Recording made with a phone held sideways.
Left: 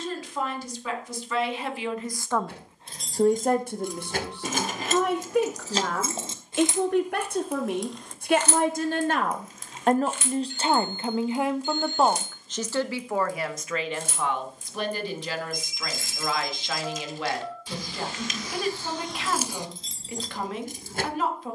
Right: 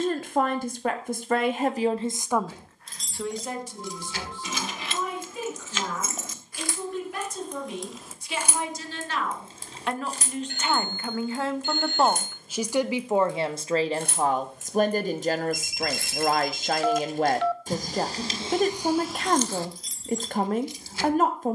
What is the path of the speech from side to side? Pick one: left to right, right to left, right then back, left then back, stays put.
left then back.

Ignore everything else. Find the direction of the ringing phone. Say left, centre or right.
right.